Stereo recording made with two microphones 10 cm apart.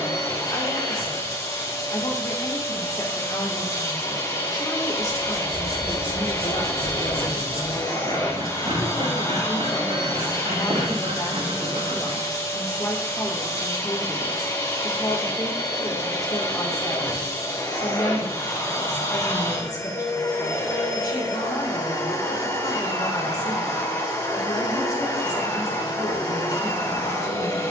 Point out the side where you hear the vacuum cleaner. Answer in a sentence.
In this clip you hear the vacuum cleaner on the left.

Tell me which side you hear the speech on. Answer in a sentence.
In this clip you hear the speech on the left.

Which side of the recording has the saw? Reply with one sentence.
You can hear the saw on the right.